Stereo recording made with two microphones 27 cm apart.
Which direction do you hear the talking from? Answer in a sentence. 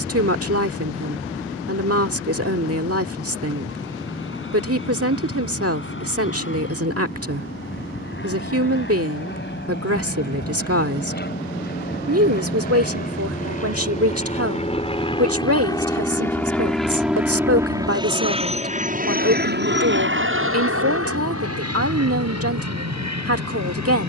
You can hear the talking on the right.